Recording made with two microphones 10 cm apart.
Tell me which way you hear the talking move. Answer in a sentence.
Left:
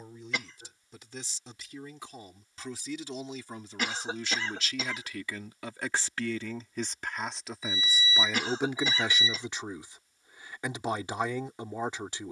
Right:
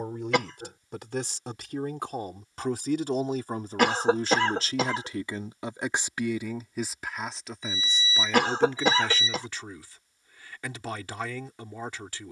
In this clip you hear the talking go from the right side to the left.